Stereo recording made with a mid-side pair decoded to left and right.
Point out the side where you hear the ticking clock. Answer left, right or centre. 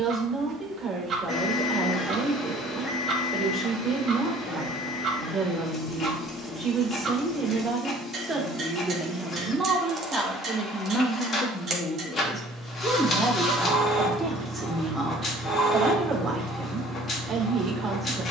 right.